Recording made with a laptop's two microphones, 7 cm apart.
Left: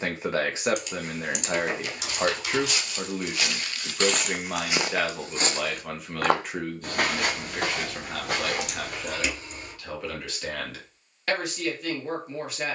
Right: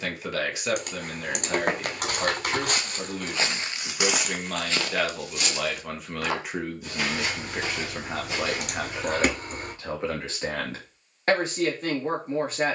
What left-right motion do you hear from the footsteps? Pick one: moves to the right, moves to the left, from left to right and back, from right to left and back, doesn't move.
moves to the left.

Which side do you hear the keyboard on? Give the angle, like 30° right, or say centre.
50° right.